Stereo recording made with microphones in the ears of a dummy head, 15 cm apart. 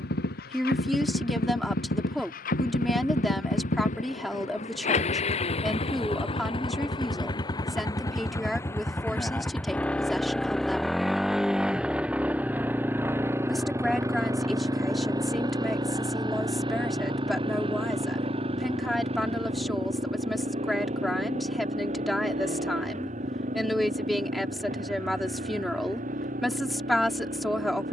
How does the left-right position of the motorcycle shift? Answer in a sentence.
You can hear the motorcycle travel towards the right.